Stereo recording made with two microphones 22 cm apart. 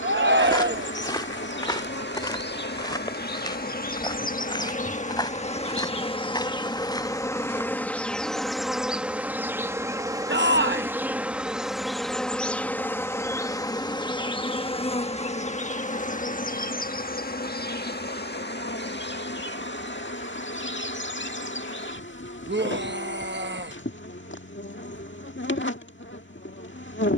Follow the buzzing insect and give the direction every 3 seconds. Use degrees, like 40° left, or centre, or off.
60° left, 40° left, 10° left, 10° right, 10° left, 40° left, 50° left, 60° left, 60° left.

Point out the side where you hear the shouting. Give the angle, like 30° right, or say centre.
50° right.